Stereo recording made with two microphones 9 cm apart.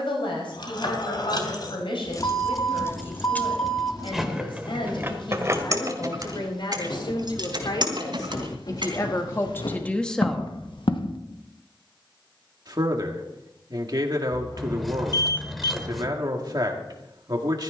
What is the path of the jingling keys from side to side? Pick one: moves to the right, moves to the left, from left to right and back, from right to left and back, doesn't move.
moves to the right.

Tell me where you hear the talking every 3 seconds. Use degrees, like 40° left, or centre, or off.
70° left, 70° left, 60° left, 20° left, 50° right, 50° right.